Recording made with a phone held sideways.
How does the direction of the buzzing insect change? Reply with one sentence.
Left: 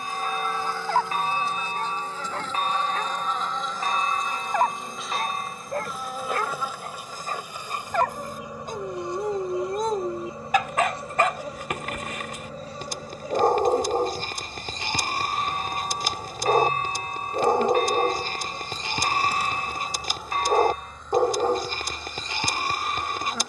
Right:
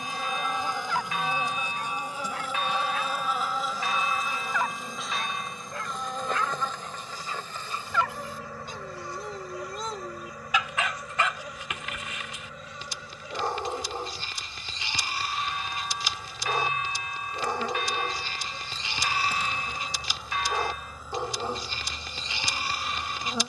In this clip you hear the buzzing insect go left and come back.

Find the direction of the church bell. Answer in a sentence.
You can hear the church bell on the left.